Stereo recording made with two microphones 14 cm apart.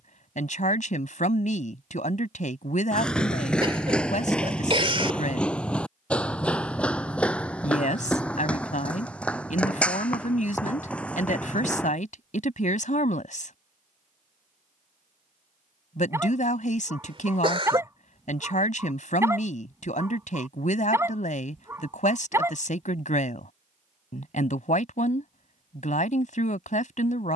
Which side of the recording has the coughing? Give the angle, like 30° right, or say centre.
40° right.